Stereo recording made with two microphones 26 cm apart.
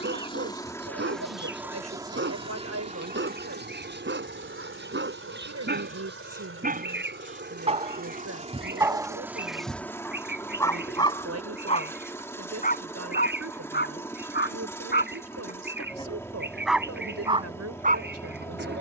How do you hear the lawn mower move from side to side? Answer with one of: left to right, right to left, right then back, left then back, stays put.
right then back.